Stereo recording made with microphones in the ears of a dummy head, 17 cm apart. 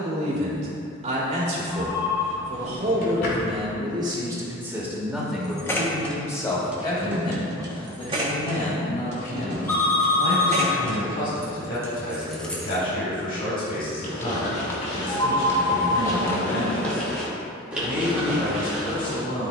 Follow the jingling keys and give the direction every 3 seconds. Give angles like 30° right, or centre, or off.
off, 10° left, 20° right, 30° right, centre, off, off.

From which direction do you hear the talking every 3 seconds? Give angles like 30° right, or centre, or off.
40° right, 10° right, 30° left, 40° left, 50° left, 50° left, 50° left.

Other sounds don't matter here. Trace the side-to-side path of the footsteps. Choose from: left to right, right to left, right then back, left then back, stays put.
left to right.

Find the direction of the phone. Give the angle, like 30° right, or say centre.
10° left.